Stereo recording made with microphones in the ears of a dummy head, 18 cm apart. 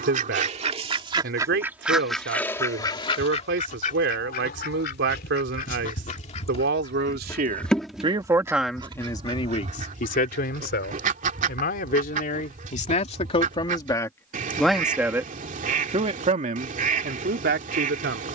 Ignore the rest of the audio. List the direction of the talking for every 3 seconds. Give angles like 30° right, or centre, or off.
60° right, 60° right, 30° right, 40° left, 30° left, 40° right.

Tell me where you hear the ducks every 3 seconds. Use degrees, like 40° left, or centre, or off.
10° right, 40° left, 10° left, 40° right, 40° right, 40° right.